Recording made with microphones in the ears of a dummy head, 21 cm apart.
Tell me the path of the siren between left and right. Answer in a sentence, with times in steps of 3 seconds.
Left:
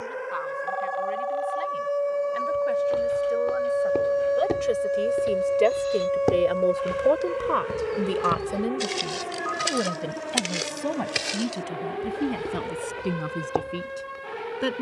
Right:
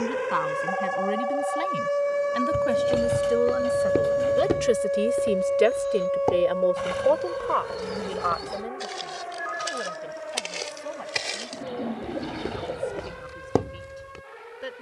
In this clip you hear the siren on the right from 0 s, in the centre from 3 s and on the left from 6 s.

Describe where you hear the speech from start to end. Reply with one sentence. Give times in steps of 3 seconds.
You can hear the speech on the right from 0 s and on the left from 6 s.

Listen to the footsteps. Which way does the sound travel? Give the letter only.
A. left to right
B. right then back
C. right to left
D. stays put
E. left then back
E.